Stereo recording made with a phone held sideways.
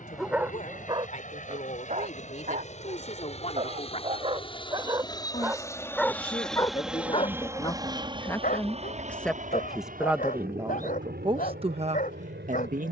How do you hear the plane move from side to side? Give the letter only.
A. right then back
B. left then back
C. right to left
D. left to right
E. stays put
D.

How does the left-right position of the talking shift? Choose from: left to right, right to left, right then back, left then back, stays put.
left to right.